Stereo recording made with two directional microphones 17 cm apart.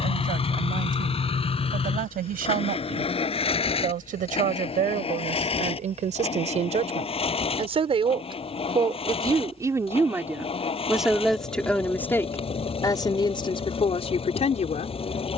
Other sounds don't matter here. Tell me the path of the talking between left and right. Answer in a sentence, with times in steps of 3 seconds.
You can hear the talking on the right from 0 s, in the centre from 9 s and on the left from 12 s.